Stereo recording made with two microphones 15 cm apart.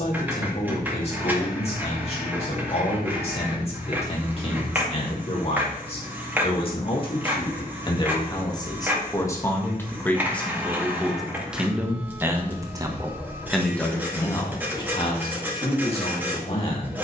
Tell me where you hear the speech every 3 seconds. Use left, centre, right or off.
left, left, left, centre, centre, left.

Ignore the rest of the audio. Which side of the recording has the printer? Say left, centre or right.
centre.